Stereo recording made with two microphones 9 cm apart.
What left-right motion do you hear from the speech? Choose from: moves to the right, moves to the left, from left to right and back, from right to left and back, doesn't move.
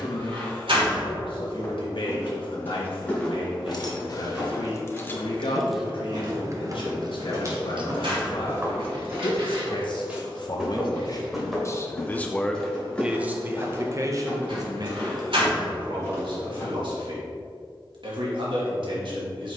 moves to the right.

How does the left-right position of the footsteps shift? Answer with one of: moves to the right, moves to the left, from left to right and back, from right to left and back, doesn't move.
from left to right and back.